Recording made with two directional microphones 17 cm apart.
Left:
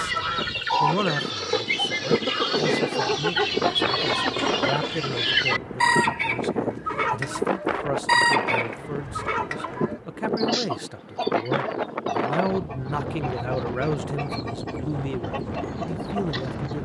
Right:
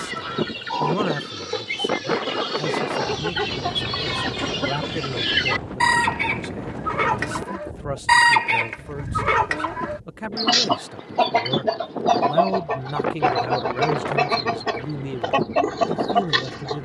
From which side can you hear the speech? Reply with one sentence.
You can hear the speech in the centre.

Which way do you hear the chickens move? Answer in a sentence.
You can hear the chickens move to the right.